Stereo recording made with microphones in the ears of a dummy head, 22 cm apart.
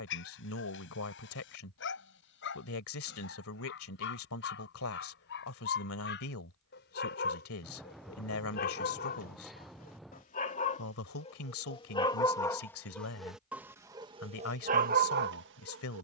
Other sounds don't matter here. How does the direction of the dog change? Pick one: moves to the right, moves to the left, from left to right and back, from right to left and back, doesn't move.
moves to the right.